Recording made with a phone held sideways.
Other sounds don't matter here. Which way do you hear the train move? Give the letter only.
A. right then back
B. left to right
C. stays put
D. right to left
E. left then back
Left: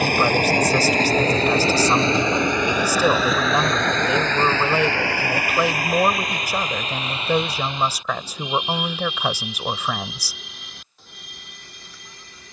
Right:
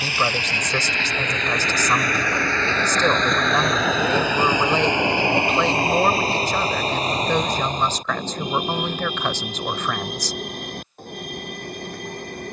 B.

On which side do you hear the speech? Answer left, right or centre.
centre.